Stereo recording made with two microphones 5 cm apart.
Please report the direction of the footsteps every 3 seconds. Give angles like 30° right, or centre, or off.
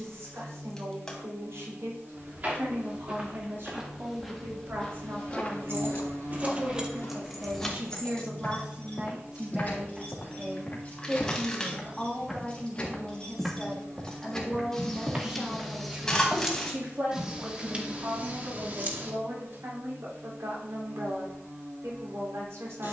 40° right, 10° left, 60° left, 30° left, 10° right, 30° right, off, off.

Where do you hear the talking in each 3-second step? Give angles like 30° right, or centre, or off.
70° right, 60° right, 30° right, 10° right, 10° left, 30° right, 60° right, 70° right.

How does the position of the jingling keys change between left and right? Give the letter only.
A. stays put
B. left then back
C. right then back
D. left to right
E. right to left
B.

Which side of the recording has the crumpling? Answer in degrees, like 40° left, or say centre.
10° left.